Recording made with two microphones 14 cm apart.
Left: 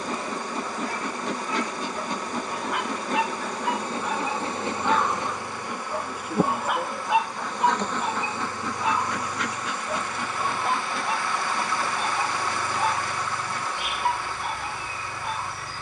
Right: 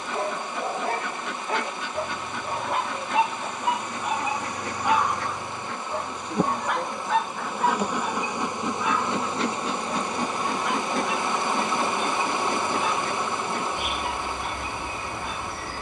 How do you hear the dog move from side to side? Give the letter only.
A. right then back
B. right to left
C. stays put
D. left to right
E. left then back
B.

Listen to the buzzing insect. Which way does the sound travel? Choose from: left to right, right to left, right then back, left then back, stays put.
left to right.